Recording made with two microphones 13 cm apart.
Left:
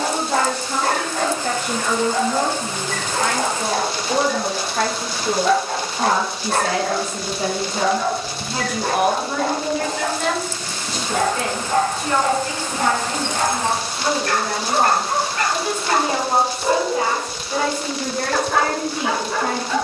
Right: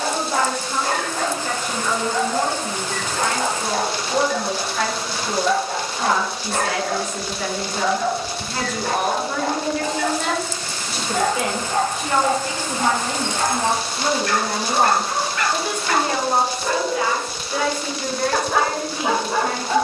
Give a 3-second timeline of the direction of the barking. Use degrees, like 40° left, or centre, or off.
70° left, 70° left, 70° left, 70° left, 60° left, 20° left, 20° right.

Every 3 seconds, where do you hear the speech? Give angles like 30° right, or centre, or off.
60° left, 50° left, 30° left, centre, 20° right, 20° left, 60° left.